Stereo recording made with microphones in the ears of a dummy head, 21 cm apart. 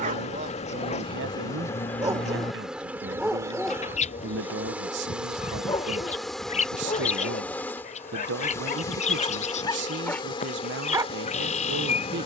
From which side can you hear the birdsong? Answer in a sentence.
In this clip you hear the birdsong on the left.